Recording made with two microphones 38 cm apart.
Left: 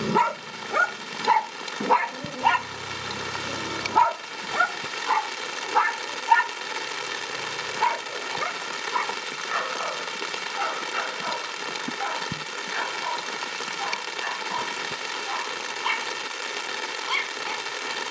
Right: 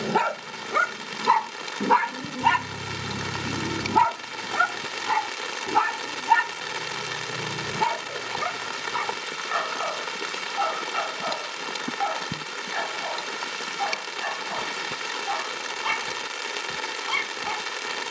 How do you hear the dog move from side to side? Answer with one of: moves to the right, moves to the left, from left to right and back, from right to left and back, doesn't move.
moves to the right.